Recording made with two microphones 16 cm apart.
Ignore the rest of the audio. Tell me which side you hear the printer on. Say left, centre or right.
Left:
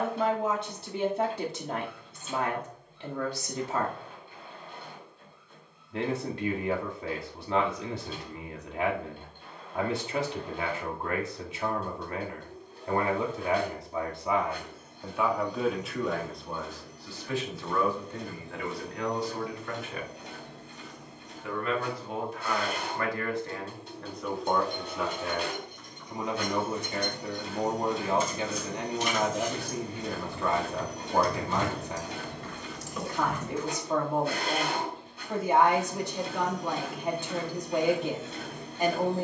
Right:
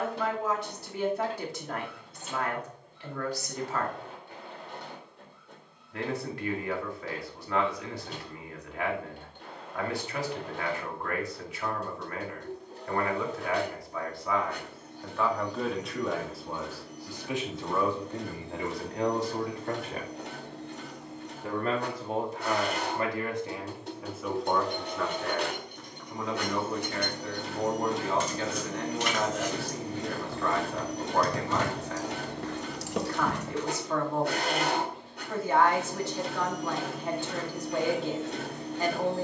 right.